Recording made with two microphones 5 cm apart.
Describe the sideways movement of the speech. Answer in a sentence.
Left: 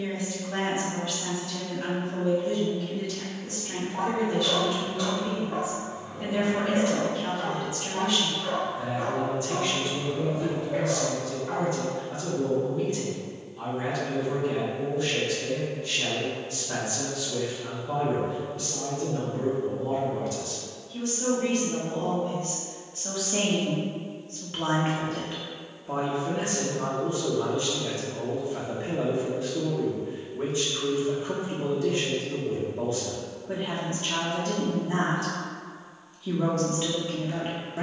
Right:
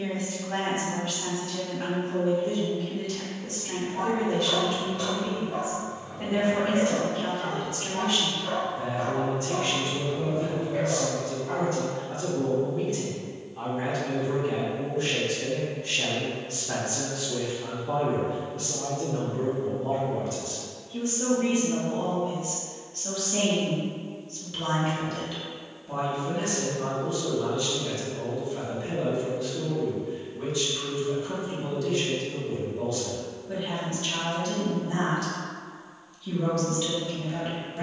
In this clip you hear the speech travel towards the left.